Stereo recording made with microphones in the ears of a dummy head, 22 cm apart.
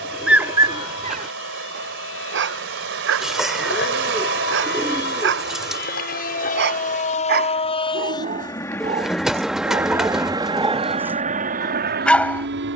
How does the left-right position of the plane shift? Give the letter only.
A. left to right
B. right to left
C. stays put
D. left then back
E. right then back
A.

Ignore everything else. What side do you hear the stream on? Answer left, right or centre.
right.